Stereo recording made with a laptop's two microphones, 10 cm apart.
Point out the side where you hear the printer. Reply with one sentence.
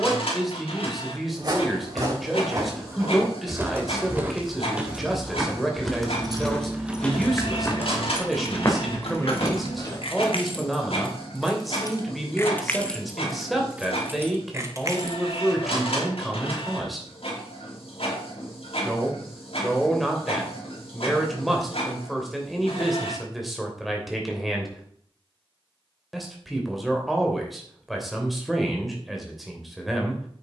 In this clip you hear the printer on the left.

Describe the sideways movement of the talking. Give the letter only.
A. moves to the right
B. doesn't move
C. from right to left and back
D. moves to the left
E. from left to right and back
B.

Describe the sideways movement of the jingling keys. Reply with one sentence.
You can hear the jingling keys go left and come back.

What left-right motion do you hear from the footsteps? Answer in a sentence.
You can hear the footsteps travel towards the left.